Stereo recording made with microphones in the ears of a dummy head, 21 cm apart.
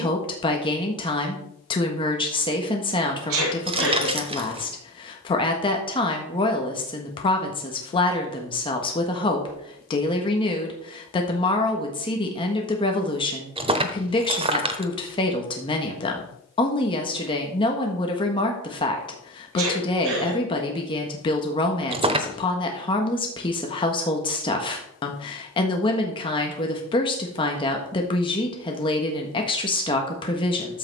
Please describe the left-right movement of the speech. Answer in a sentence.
You can hear the speech stay put.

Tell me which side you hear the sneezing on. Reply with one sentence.
You can hear the sneezing on the right.